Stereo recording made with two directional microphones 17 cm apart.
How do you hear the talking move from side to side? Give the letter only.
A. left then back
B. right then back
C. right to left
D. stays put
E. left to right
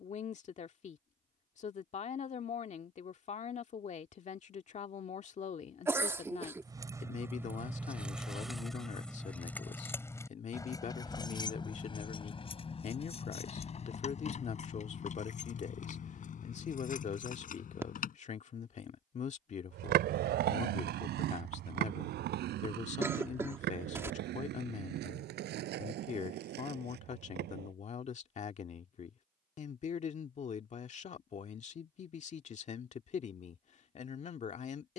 D.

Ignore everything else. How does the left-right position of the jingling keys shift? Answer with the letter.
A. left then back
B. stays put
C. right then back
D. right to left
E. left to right
D.